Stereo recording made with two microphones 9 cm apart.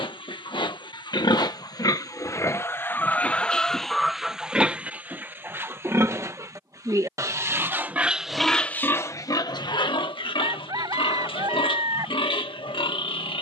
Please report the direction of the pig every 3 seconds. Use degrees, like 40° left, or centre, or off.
50° left, 10° right, 20° right, 60° left, 70° left.